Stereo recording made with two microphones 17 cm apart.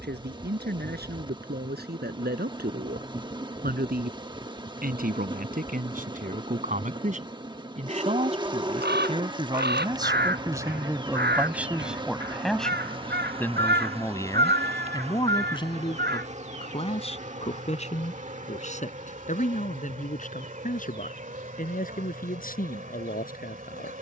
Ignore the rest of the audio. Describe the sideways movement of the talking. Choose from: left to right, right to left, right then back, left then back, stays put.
right to left.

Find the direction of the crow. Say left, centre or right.
right.